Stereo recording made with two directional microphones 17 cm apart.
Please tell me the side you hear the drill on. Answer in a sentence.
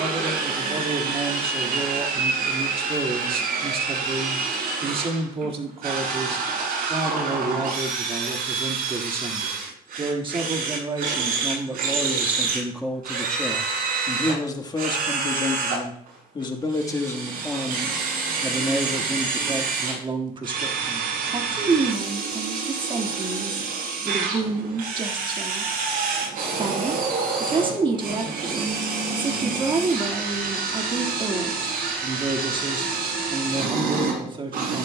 You can hear the drill on the right.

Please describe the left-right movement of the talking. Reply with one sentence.
You can hear the talking move from right to left and back again.